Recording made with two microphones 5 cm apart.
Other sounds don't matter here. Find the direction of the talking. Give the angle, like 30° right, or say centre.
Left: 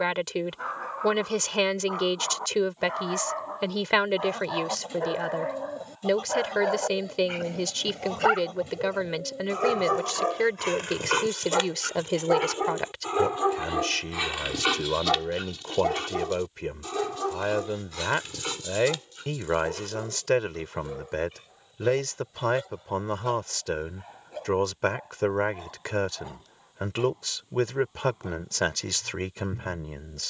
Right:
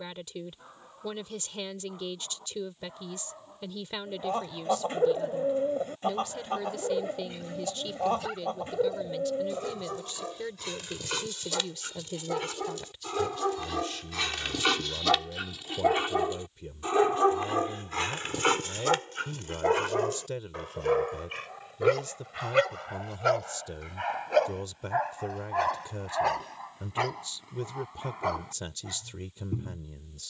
70° left.